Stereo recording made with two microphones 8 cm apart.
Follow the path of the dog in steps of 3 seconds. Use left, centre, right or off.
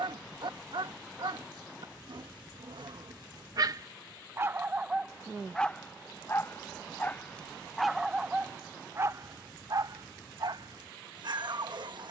right, right, centre, right.